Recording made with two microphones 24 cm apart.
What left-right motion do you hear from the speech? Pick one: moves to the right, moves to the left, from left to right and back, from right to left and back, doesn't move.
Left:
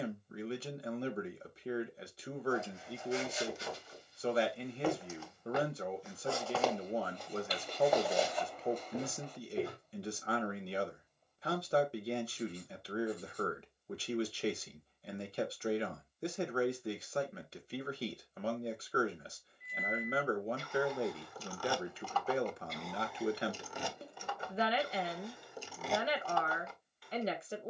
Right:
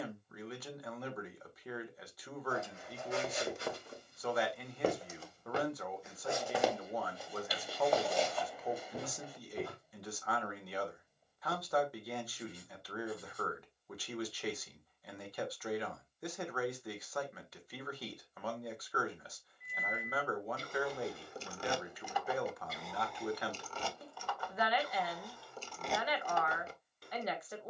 doesn't move.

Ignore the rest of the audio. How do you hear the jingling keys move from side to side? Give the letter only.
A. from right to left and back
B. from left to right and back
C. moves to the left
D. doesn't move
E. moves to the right
A.